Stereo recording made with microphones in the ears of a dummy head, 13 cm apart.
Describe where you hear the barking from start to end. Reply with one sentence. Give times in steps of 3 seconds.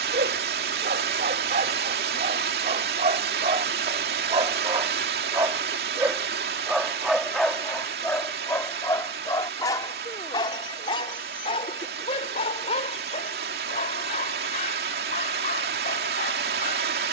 In this clip you hear the barking on the right from 0 s, in the centre from 6 s and on the left from 9 s.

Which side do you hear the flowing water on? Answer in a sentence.
You can hear the flowing water on the right.